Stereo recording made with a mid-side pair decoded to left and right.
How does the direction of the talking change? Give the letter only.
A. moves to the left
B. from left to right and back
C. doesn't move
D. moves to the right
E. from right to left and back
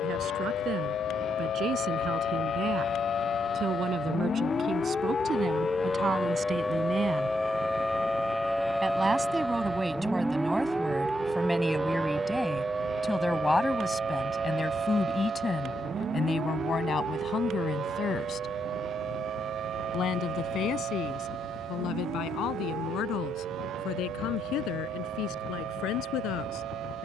A.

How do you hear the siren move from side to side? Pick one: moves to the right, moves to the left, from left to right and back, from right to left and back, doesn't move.
moves to the right.